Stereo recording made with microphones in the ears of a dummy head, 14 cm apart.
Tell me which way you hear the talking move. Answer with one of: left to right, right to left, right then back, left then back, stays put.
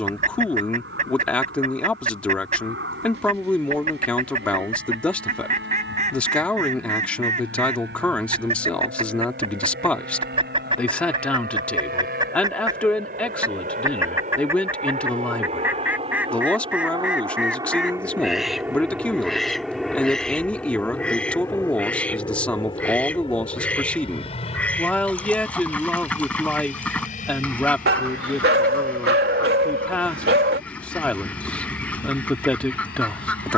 stays put.